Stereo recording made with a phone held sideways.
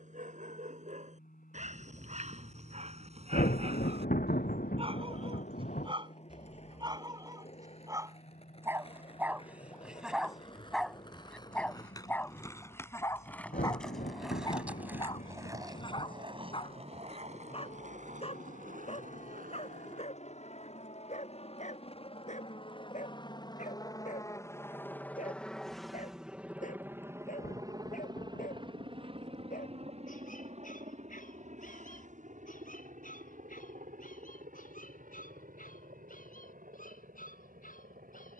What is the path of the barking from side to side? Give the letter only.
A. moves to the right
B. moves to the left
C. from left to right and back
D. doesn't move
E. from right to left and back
B.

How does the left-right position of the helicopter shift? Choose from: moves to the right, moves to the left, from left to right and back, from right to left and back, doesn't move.
moves to the right.